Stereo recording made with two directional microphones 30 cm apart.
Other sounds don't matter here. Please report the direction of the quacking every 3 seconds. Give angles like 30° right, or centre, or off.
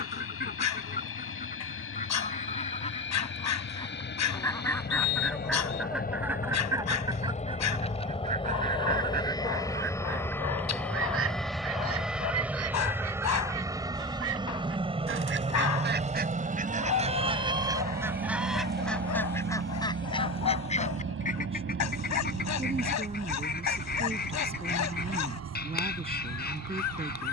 30° left, 10° left, 20° right, 40° right, 50° right, 30° right, 10° left, 30° left, 30° left.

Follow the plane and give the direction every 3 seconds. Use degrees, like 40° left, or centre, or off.
50° left, 40° left, 20° left, 10° left, 10° right, 20° right, 30° right, 40° right, 50° right.